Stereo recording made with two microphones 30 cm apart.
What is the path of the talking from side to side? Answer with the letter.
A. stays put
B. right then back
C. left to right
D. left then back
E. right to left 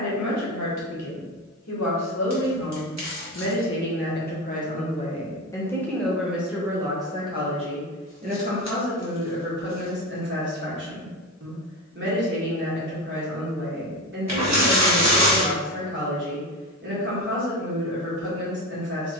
C.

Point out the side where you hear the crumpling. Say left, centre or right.
right.